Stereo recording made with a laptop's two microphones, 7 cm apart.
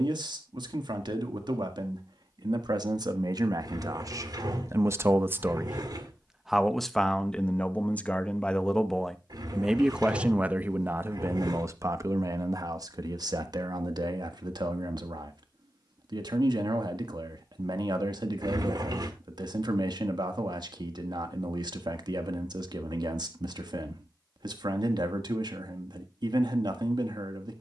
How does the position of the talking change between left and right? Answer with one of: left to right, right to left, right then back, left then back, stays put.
left then back.